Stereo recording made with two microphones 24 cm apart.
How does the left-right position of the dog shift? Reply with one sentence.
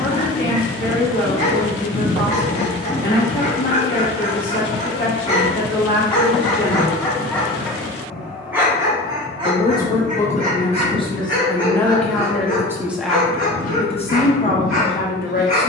You can hear the dog move from left to right.